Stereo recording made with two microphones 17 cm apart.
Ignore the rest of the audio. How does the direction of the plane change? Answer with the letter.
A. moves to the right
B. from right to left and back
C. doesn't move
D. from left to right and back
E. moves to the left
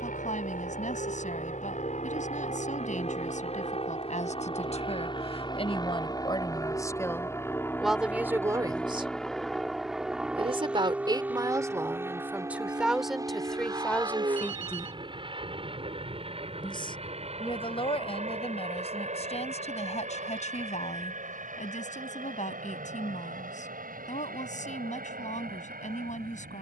A.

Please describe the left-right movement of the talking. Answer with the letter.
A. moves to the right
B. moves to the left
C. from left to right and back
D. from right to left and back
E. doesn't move
C.